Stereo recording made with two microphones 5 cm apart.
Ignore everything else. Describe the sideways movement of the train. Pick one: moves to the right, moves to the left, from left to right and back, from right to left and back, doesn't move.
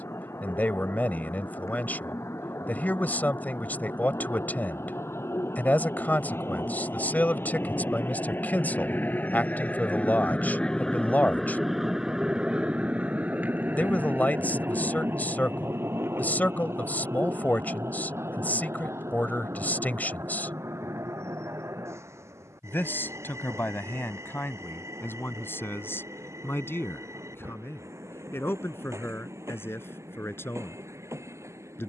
moves to the right.